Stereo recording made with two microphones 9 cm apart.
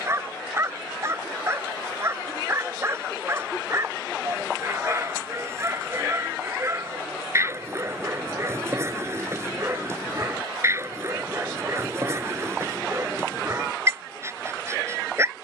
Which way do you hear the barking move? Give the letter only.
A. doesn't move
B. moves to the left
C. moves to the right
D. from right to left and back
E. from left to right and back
A.